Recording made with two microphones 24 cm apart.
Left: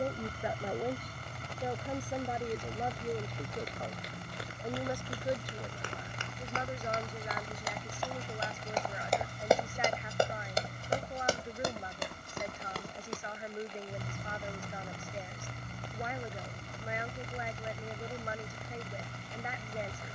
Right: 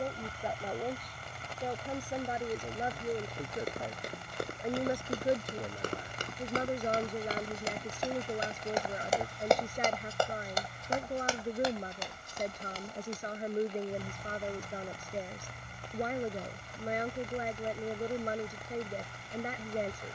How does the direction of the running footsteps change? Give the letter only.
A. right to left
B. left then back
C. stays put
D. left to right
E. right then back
A.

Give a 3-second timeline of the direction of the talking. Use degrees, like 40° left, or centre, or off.
centre, 20° right, 40° right, 40° right, 40° right, 40° right, 40° right.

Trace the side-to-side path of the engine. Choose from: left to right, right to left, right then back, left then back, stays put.
stays put.